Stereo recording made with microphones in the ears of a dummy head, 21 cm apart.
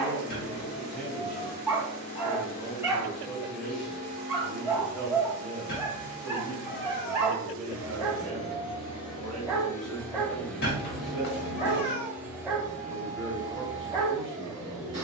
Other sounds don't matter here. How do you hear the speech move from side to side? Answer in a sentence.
In this clip you hear the speech stay in one place.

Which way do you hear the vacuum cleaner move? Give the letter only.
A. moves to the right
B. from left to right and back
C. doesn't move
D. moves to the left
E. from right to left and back
A.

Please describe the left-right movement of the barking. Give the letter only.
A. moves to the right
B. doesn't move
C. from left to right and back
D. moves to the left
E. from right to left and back
B.